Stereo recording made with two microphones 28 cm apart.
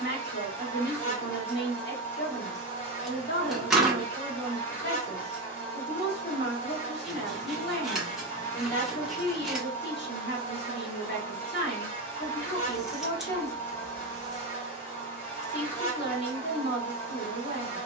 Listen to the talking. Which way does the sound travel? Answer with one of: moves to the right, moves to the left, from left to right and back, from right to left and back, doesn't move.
doesn't move.